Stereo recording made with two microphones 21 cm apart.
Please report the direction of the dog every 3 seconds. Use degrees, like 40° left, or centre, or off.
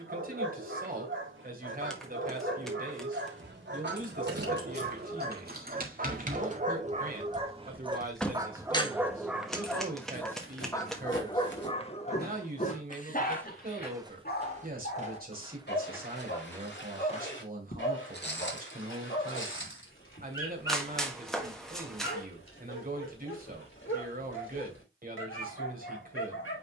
70° right, 50° right, 30° right, 10° left, 40° left, 60° left, 60° left, 70° left, 70° left.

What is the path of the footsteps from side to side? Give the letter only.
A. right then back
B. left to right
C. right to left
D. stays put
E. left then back
A.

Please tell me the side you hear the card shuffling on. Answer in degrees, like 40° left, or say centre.
centre.